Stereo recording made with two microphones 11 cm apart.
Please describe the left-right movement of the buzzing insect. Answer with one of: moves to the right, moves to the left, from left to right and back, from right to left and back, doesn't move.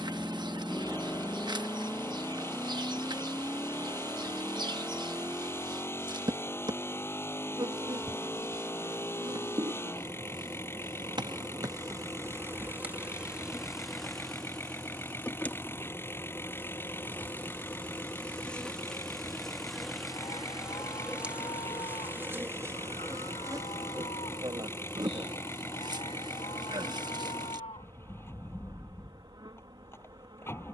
from right to left and back.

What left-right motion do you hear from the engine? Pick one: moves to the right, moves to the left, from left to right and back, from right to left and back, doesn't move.
doesn't move.